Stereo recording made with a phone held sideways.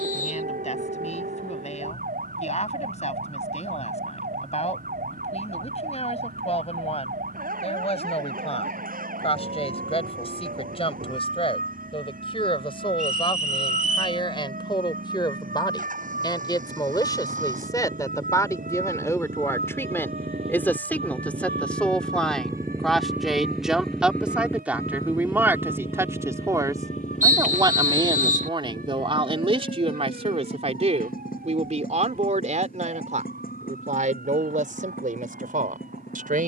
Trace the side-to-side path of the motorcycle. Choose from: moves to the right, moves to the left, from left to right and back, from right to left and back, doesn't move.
moves to the left.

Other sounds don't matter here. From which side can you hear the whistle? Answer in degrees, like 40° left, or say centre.
60° right.